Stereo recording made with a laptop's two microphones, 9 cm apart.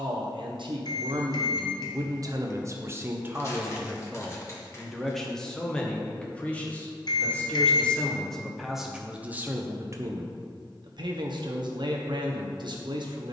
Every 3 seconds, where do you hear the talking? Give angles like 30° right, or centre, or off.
60° right, 10° right, 10° left, 50° right, 60° right.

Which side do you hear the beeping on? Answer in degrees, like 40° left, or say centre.
50° left.